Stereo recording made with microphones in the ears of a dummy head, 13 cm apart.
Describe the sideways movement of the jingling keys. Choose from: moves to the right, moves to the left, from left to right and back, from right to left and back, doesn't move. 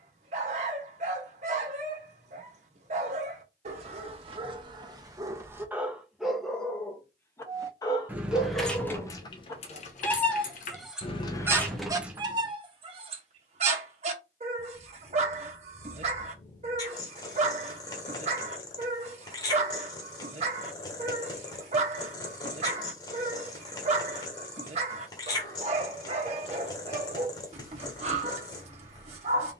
from right to left and back.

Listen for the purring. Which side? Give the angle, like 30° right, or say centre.
30° left.